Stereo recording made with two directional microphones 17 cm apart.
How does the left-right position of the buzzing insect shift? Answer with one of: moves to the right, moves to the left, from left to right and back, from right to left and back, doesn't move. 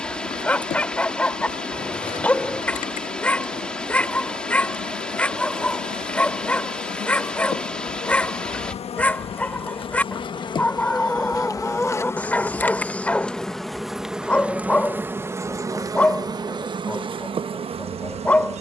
moves to the right.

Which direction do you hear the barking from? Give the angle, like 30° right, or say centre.
10° left.